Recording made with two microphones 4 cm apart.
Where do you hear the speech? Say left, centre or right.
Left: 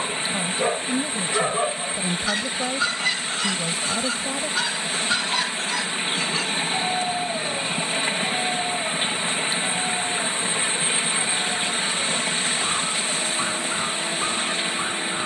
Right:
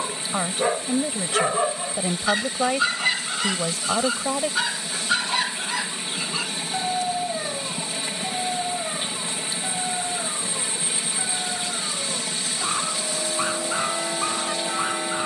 right.